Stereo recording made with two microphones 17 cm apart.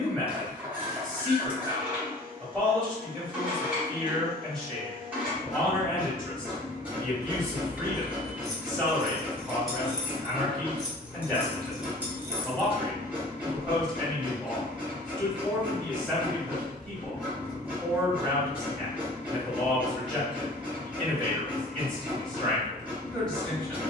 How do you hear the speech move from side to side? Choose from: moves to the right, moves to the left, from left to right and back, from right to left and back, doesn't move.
doesn't move.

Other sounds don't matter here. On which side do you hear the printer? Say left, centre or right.
centre.